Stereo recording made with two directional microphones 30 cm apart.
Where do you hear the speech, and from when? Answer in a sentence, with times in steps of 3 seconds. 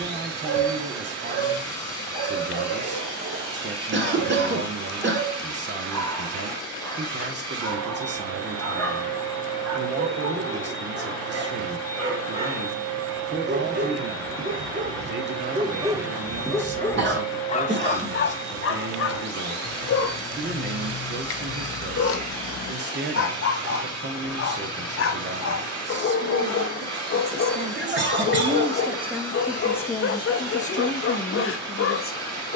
You can hear the speech on the right from 0 s, in the centre from 27 s and on the left from 30 s.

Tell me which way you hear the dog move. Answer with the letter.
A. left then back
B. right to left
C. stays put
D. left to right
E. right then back
B.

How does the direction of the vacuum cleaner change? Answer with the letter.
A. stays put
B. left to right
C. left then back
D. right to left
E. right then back
A.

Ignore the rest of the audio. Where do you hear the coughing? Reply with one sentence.
In this clip you hear the coughing on the right.